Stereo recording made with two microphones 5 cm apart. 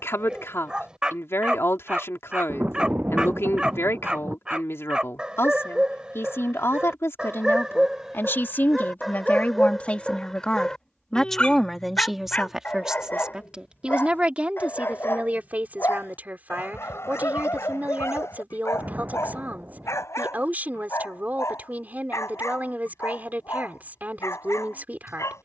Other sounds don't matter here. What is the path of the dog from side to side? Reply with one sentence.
In this clip you hear the dog travel towards the left.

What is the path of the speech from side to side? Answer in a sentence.
You can hear the speech move from left to right.